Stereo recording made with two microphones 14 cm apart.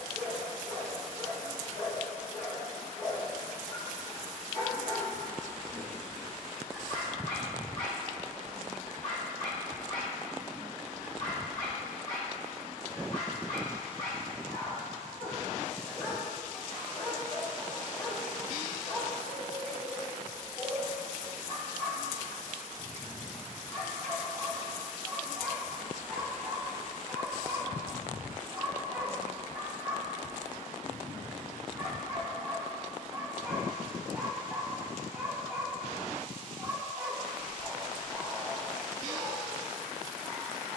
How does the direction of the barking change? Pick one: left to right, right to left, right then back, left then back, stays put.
left to right.